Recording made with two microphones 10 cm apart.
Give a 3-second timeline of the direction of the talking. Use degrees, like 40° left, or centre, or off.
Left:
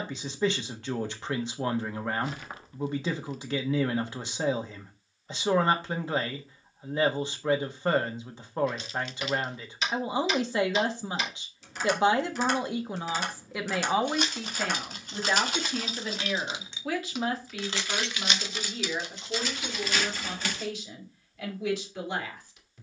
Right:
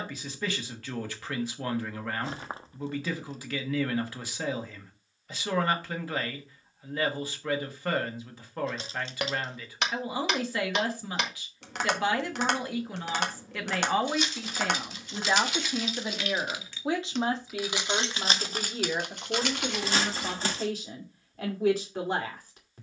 20° left, 20° left, 20° left, 20° left, 10° left, 20° right, 40° right, 40° right.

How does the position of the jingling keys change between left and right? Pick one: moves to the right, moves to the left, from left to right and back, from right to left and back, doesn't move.
moves to the right.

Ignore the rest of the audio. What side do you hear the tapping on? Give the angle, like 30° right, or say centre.
70° right.